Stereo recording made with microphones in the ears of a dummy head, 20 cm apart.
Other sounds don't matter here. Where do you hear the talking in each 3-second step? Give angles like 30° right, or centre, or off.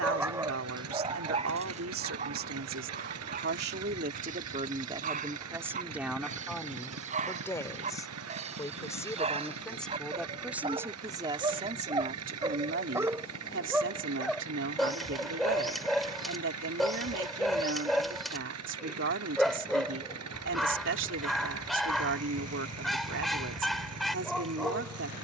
60° right, 30° right, 10° left, 10° right, 50° right, 60° right, 60° right, 60° right, 60° right.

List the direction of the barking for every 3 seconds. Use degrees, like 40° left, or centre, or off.
30° right, 40° right, 30° right, 30° right, 10° right, centre, centre, centre, centre.